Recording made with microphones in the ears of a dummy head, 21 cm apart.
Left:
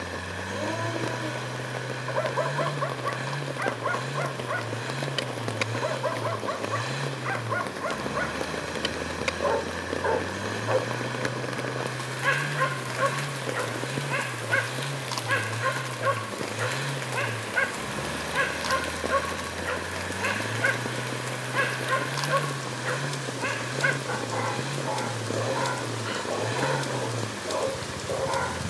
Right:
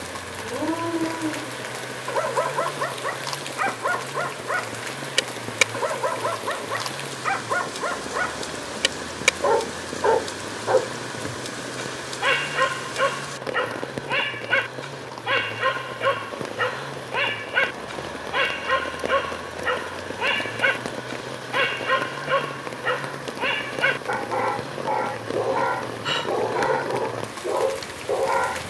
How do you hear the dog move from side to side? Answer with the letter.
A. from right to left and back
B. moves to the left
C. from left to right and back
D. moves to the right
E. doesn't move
E.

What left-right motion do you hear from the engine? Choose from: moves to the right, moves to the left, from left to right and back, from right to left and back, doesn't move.
doesn't move.